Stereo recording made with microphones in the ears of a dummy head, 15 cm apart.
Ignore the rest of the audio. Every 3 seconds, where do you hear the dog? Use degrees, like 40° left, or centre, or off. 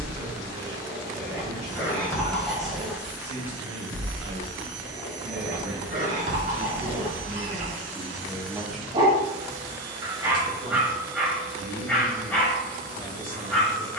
10° left, 40° right, 50° right, 10° right, 10° left.